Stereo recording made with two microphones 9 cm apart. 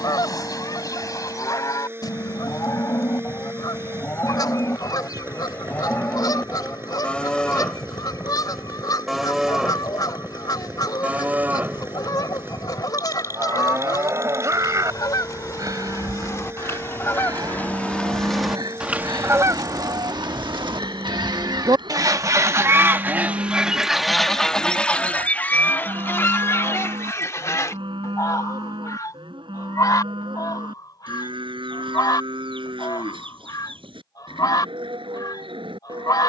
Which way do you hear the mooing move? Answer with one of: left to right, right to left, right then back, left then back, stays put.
left to right.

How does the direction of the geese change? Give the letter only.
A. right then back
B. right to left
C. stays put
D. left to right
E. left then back
A.